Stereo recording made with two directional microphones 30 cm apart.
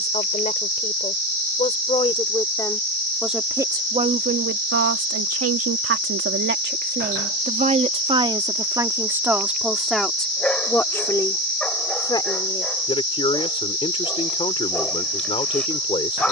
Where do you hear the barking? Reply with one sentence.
You can hear the barking in the centre.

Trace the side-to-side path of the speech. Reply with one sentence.
In this clip you hear the speech go right and come back.